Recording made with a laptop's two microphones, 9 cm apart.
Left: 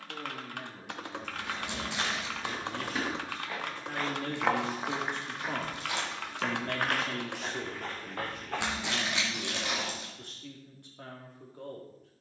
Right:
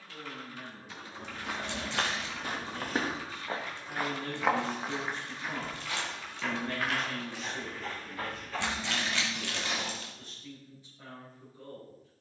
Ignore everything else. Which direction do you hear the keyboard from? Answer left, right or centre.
left.